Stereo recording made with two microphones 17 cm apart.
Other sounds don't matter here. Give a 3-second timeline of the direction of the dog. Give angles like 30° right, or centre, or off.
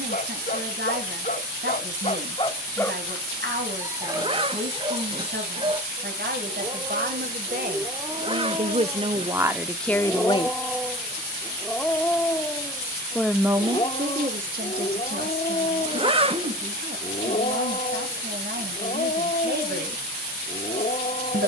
40° left, 30° right, 20° right, centre, 30° left, 50° left, 50° left.